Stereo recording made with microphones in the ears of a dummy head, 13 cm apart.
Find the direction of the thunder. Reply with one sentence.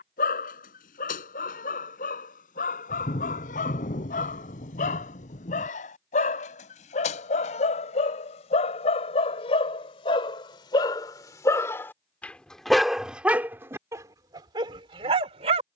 In this clip you hear the thunder on the left.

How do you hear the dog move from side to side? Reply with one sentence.
You can hear the dog go from the left side to the right.